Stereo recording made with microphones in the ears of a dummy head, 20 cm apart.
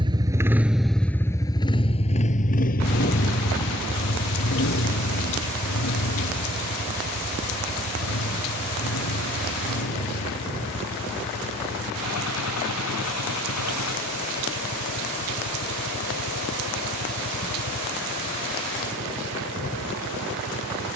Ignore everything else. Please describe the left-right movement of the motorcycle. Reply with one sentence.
In this clip you hear the motorcycle move from right to left.